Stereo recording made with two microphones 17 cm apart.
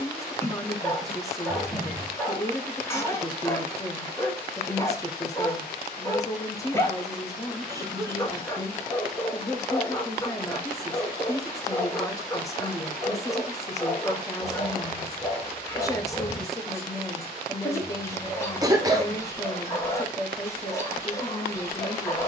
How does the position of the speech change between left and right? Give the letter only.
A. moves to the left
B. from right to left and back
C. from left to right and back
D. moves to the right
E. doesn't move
E.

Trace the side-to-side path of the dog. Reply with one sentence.
In this clip you hear the dog stay put.